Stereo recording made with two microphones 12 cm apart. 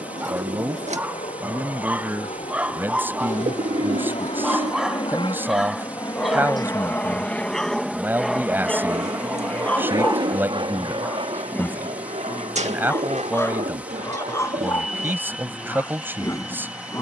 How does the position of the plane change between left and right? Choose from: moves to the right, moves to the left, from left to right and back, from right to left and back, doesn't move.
moves to the right.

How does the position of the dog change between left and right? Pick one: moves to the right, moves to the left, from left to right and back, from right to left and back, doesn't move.
moves to the left.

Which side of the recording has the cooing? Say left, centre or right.
right.